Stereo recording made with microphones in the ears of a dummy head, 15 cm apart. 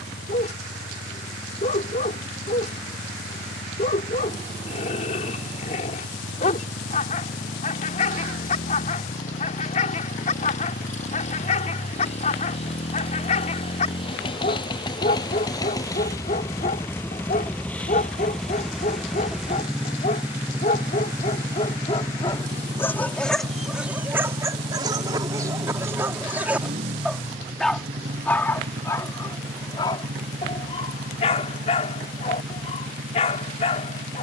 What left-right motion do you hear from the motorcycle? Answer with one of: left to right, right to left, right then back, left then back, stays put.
left to right.